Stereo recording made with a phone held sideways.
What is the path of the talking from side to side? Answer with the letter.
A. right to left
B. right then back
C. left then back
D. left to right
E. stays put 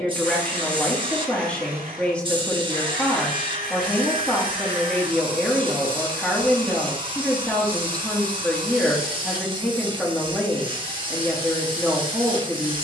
E.